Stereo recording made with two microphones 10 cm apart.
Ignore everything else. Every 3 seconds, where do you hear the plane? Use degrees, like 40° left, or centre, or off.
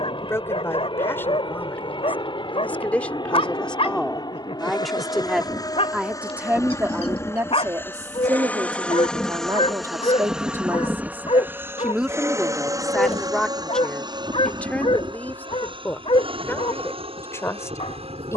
60° left, 50° left, 20° left, 10° right, 40° right, 50° right.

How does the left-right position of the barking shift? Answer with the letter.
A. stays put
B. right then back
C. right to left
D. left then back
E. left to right
A.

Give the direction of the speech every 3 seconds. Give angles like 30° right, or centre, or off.
20° left, centre, 30° right, 30° right, centre, 20° left.